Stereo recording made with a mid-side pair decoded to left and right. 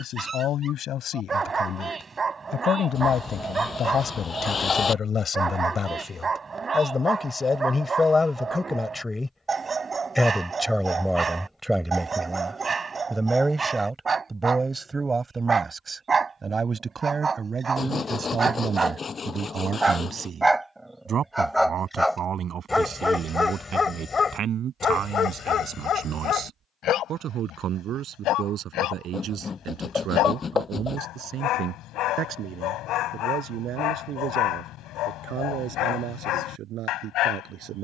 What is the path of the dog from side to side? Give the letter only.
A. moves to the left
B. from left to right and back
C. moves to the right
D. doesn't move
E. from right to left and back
A.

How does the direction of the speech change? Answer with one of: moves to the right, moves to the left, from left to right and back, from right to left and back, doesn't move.
moves to the right.